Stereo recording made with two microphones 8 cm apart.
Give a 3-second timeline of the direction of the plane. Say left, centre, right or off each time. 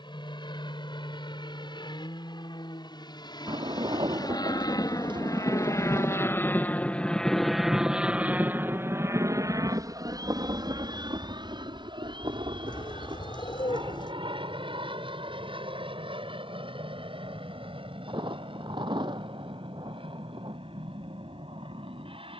left, left, centre, right, right, right, right, right.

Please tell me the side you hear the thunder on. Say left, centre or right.
right.